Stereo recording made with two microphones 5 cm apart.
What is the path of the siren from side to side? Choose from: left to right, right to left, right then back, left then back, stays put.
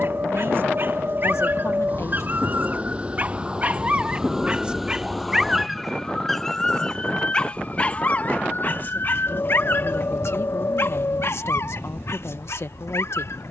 right to left.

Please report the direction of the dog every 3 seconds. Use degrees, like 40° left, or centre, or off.
50° right, 20° right, 20° left, 50° left, 70° left.